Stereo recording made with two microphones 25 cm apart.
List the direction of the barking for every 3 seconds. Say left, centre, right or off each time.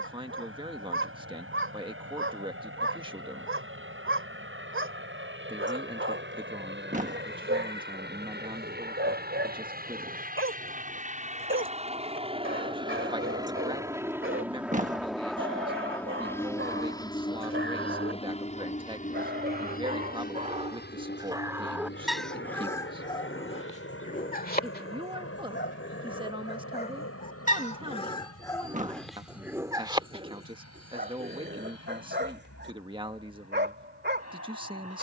right, right, right, right, right, right, right, centre, left, centre, right, right.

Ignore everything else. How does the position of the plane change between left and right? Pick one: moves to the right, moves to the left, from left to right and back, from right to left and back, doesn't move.
moves to the left.